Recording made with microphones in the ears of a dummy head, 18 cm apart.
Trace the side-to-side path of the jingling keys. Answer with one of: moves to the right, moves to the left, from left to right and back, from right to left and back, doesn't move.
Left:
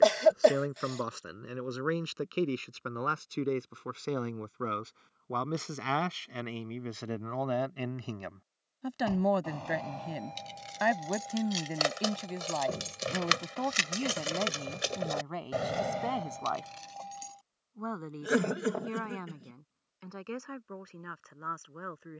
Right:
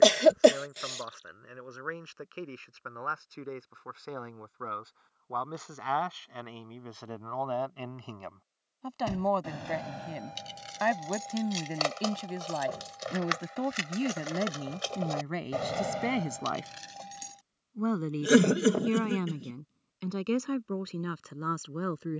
from right to left and back.